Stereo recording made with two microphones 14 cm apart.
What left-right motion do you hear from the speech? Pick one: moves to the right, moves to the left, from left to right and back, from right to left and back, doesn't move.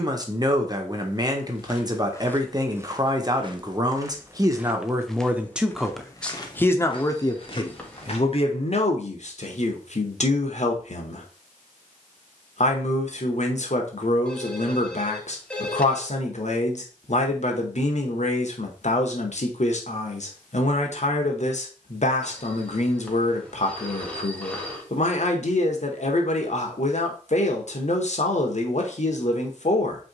moves to the left.